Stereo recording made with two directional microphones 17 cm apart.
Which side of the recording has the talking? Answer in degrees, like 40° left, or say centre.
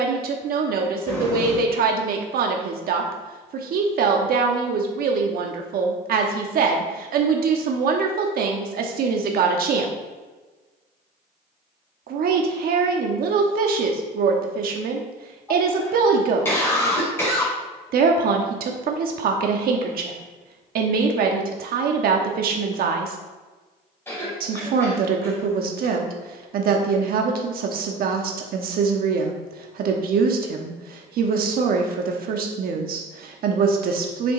60° right.